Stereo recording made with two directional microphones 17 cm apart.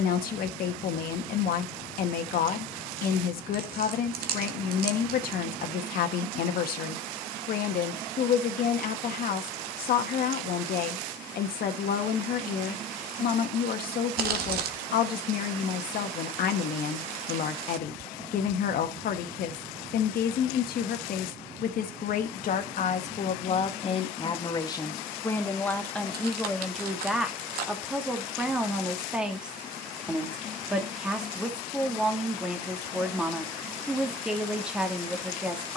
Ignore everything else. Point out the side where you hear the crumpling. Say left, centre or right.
right.